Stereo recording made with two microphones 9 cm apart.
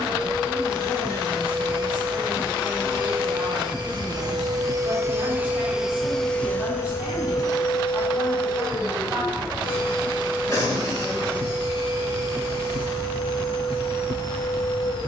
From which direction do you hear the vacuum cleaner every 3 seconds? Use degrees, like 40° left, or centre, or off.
70° right, 40° right, 40° left, 70° left, 70° left.